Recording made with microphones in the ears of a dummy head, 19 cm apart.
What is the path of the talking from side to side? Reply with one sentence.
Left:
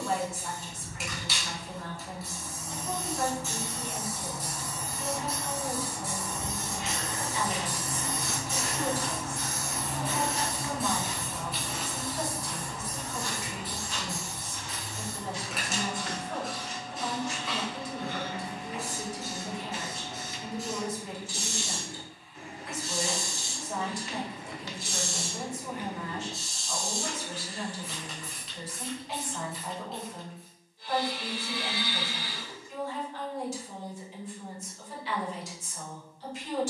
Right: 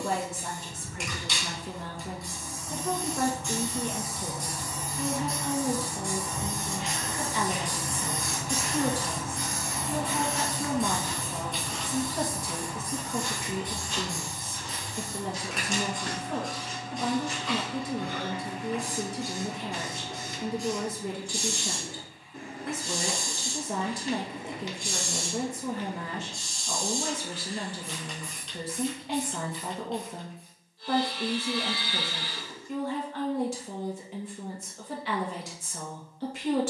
In this clip you hear the talking stay put.